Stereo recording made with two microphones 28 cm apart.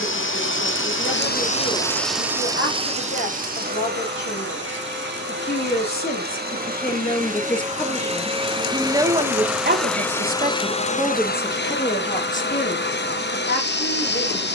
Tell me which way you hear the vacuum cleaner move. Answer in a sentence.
In this clip you hear the vacuum cleaner move from left to right and back again.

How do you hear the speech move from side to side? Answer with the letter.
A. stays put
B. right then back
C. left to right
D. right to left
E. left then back
B.